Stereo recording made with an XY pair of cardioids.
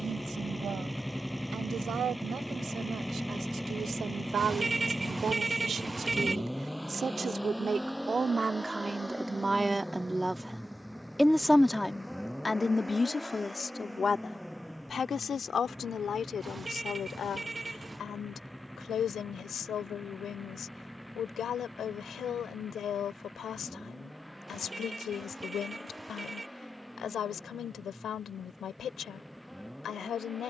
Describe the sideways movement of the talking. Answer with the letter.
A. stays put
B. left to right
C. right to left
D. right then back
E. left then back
C.